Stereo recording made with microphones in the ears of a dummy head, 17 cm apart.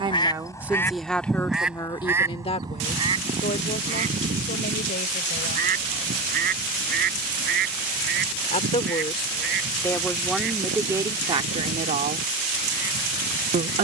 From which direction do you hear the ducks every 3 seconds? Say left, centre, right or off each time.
centre, right, right, right, right.